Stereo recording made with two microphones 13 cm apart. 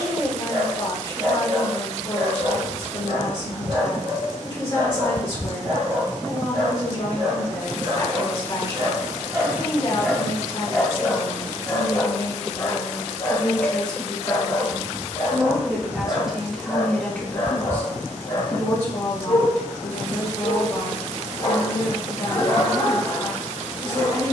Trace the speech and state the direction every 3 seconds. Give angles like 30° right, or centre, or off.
40° left, 40° left, 40° left, 40° left, 10° left, centre, 40° left, 40° left.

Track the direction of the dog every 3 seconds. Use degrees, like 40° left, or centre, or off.
50° right, 50° right, 40° right, centre, 40° left, 50° left, 50° left, 50° left.